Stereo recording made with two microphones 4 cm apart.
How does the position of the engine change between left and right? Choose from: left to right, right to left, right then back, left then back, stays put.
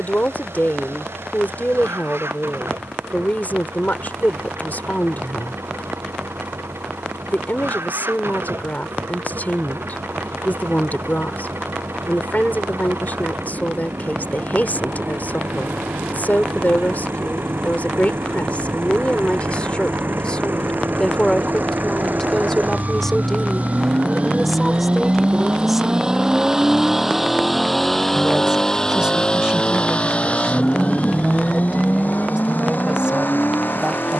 right to left.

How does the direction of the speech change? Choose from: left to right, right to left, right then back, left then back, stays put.
left to right.